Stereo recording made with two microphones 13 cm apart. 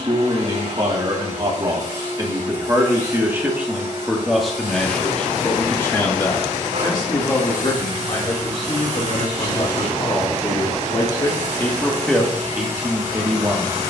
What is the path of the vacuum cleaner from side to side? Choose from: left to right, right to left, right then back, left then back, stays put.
stays put.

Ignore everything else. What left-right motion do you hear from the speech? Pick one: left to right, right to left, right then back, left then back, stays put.
left then back.